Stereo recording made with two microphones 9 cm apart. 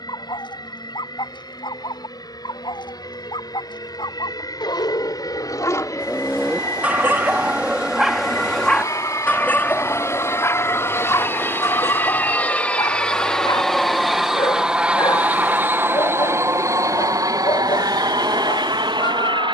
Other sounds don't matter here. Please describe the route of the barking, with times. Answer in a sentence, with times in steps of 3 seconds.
You can hear the barking on the left from 0 s, in the centre from 6 s and on the left from 9 s.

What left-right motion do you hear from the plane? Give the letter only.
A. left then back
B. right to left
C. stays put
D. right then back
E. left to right
E.